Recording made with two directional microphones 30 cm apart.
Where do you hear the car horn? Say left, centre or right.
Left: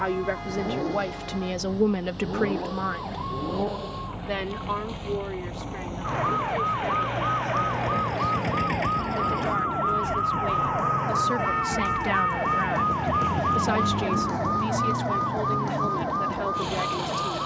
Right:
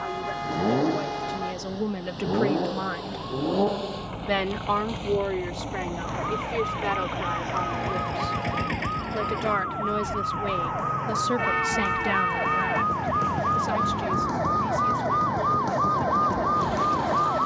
right.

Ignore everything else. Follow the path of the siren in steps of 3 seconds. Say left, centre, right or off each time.
left, left, left, left, centre, right.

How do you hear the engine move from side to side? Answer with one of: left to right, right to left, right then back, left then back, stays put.
right to left.